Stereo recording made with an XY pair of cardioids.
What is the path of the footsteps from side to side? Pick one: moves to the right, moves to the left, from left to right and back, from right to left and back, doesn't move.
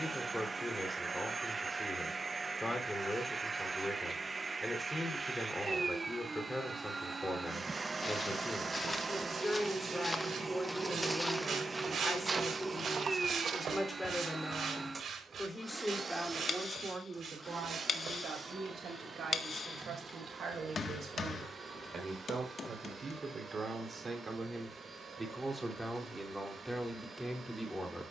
moves to the right.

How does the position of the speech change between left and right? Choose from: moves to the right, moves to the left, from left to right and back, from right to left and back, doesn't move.
from left to right and back.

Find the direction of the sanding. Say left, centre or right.
right.